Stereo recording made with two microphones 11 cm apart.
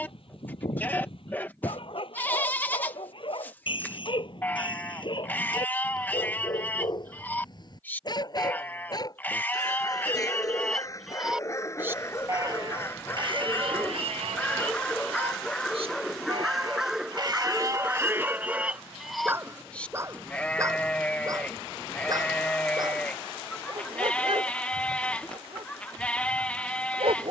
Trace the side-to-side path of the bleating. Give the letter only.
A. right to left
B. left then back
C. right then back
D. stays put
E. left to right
C.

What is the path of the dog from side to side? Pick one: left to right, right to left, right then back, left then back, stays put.
left to right.